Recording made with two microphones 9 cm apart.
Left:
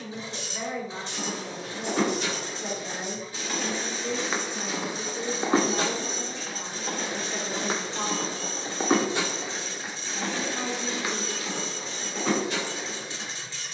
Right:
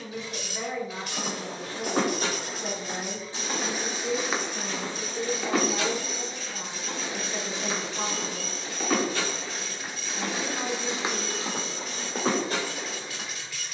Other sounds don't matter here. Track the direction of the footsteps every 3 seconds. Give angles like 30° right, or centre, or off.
40° right, 10° left, 40° left, 10° right, 40° right.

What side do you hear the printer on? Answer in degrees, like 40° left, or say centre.
30° left.